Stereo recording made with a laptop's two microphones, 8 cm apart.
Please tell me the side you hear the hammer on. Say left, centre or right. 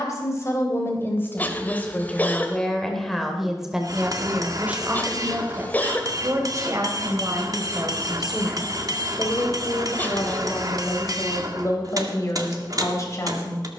right.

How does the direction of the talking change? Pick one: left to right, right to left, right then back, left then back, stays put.
right then back.